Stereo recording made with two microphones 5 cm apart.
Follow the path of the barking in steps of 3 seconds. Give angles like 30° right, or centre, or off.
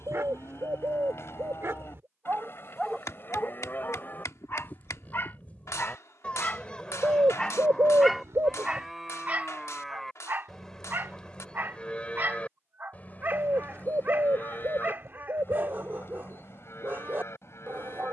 50° right, 40° left, 10° left, 40° right, 40° right, 40° right.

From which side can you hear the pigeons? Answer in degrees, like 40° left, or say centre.
70° right.